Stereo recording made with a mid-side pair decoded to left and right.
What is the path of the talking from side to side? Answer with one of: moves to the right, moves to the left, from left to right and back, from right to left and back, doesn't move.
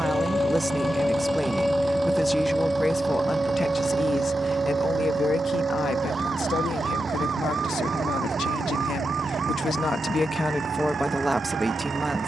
from right to left and back.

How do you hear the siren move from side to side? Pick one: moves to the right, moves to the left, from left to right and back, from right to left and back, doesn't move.
moves to the right.